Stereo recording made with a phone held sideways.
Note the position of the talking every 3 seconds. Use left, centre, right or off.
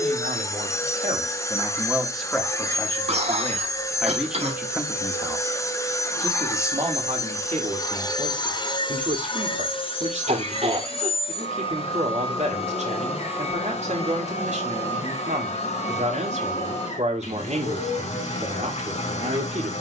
right, centre, right, right, right, right, right.